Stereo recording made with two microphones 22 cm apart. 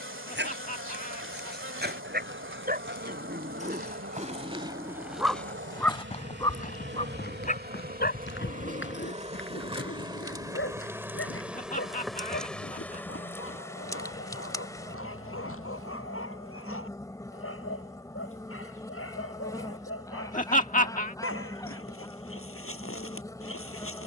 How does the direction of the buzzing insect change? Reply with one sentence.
You can hear the buzzing insect go from the right side to the left.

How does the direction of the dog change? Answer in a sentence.
In this clip you hear the dog travel towards the left.